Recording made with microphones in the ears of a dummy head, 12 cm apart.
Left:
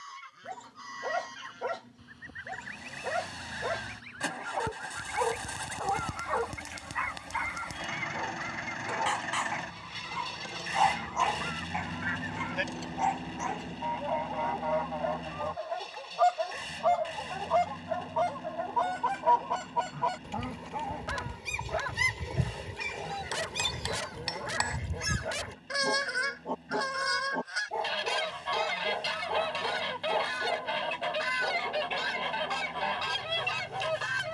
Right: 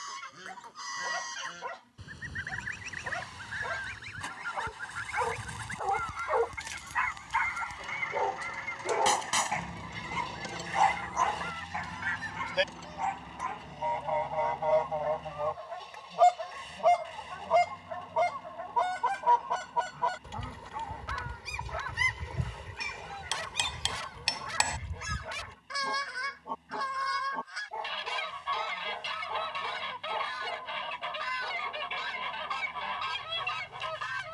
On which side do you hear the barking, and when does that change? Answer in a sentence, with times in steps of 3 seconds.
You can hear the barking on the left from 0 s, on the right from 6 s, in the centre from 9 s and on the left from 12 s.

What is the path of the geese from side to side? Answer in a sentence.
You can hear the geese move from right to left.